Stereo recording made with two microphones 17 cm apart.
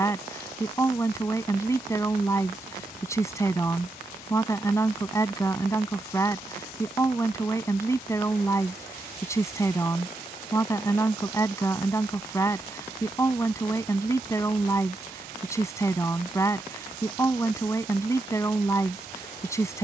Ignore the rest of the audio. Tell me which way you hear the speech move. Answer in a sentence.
In this clip you hear the speech stay in one place.